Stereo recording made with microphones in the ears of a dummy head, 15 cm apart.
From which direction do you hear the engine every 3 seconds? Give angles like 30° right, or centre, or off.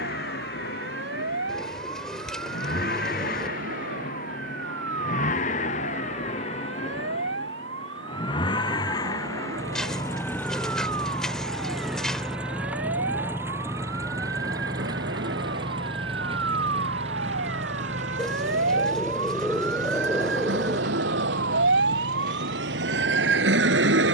60° left, 50° left, 30° left, 10° left, 10° right, 30° right, 50° right, 50° right.